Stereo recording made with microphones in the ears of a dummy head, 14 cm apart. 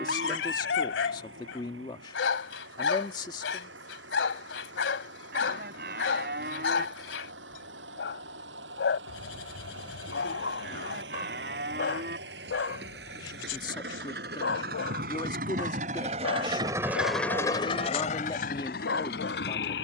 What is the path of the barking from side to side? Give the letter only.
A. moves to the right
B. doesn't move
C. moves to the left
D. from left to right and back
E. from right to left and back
B.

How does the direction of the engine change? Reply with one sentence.
In this clip you hear the engine go from the right side to the left.